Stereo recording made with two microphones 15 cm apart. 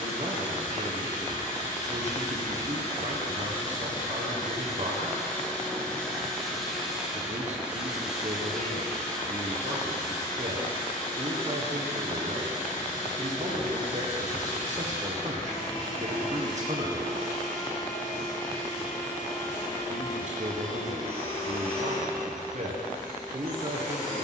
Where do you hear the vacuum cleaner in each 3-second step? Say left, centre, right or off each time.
left, left, centre, left, left, left, left, left.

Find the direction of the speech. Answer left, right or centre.
right.